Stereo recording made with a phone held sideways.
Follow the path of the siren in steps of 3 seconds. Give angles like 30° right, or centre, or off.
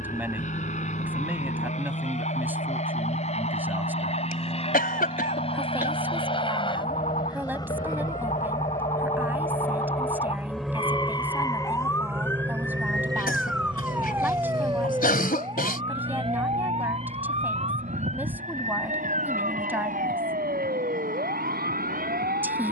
80° left, 70° left, 60° left, 40° left, centre, 40° right, 50° right, 60° right.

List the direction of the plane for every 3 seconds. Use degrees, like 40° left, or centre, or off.
60° left, 50° left, 30° left, centre, 30° right, 50° right, 60° right, 70° right.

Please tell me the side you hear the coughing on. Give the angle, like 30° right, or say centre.
70° left.